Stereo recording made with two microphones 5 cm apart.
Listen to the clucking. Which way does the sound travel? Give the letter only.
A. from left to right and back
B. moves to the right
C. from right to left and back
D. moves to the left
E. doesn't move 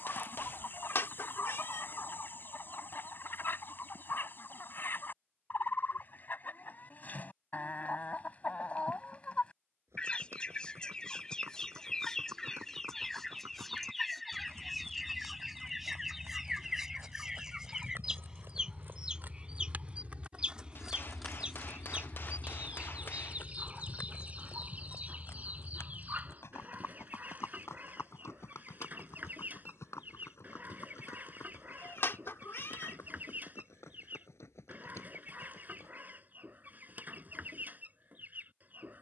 B.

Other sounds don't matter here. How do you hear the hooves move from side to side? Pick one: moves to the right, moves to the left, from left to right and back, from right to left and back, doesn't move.
moves to the left.